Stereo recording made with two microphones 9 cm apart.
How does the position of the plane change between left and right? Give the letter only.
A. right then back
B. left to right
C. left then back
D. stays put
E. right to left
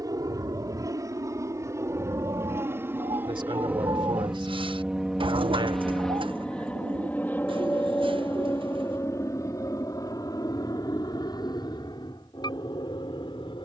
E.